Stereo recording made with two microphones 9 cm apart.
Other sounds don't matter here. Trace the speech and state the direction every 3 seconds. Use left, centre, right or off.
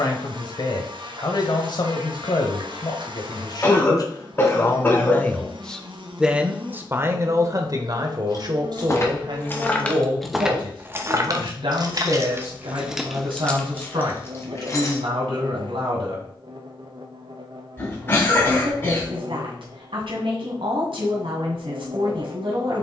left, left, right, right, right, right, right, right.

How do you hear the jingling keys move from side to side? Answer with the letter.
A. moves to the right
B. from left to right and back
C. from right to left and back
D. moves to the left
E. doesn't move
B.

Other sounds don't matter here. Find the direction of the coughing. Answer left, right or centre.
left.